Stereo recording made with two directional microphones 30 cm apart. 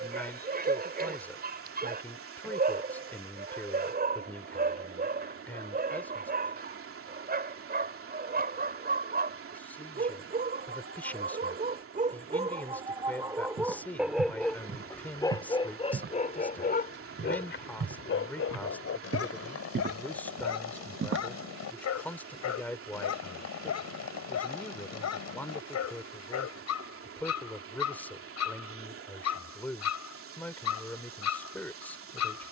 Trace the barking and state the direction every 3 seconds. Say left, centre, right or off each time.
right, right, right, right, centre, left, left, left, left, left, left.